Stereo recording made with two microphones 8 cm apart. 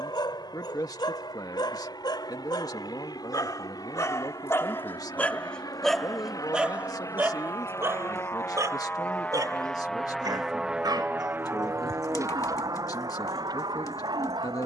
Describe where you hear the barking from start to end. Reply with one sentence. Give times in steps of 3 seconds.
In this clip you hear the barking on the left from 0 s and on the right from 6 s.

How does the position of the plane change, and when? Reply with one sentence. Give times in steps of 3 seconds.
In this clip you hear the plane on the left from 0 s, in the centre from 9 s and on the right from 12 s.